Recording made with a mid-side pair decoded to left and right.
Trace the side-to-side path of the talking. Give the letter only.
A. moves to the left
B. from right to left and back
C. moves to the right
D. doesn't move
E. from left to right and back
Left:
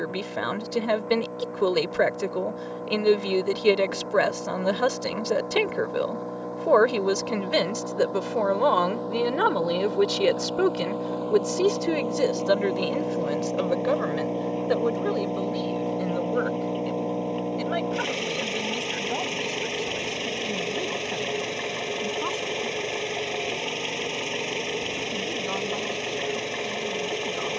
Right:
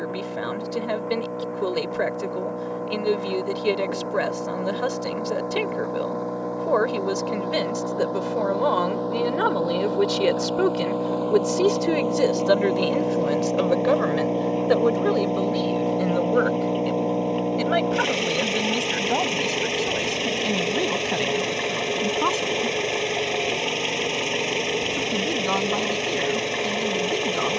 C.